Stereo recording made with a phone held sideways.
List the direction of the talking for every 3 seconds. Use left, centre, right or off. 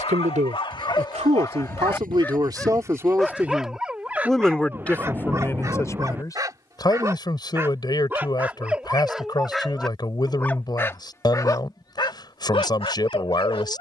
right, centre, left, left, left.